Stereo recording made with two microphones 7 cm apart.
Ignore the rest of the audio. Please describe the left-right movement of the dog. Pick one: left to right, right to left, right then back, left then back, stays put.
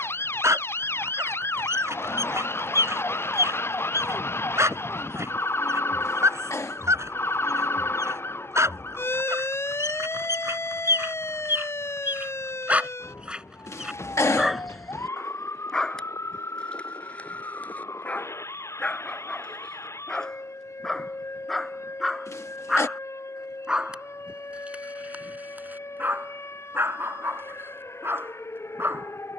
left then back.